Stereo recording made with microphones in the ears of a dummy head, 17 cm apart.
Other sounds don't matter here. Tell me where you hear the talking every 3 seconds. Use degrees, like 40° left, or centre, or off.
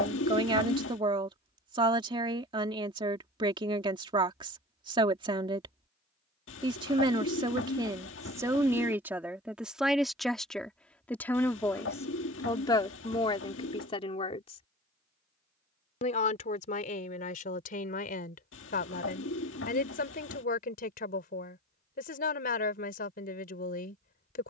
20° right, 20° right, 20° right, centre, 30° left, 40° left, 50° left, 50° left.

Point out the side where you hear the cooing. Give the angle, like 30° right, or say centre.
70° left.